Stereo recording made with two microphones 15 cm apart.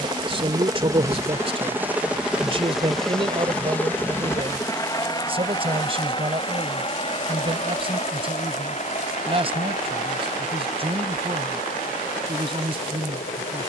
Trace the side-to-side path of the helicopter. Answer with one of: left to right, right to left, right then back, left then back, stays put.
right to left.